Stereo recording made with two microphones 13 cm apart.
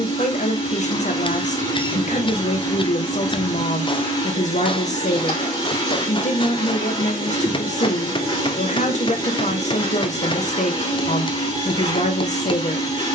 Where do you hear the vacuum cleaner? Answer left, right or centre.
left.